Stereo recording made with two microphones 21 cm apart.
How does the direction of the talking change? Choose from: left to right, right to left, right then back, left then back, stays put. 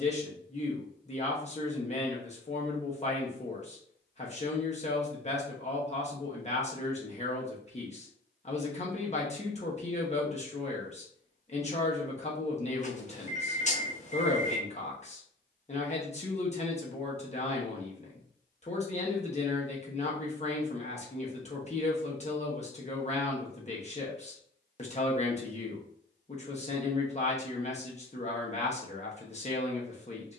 stays put.